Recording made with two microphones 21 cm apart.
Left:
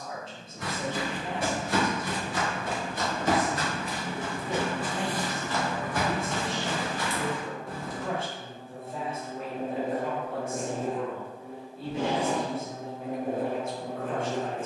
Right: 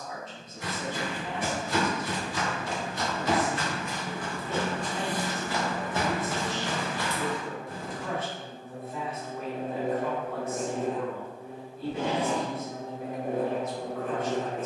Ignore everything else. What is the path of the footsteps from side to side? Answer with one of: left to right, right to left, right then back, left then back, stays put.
right then back.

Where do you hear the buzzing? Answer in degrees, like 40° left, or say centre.
70° right.